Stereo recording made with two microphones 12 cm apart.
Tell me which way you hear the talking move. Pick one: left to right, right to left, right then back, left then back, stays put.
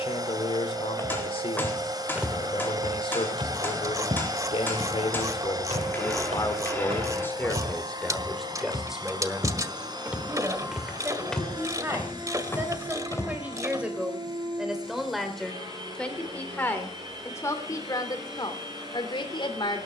right then back.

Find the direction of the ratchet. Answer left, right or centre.
right.